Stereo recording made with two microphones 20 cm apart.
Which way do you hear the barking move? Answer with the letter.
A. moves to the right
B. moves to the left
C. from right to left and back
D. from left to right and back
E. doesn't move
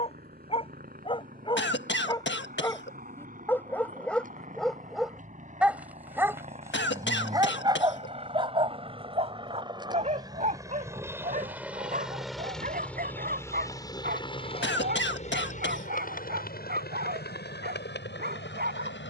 A.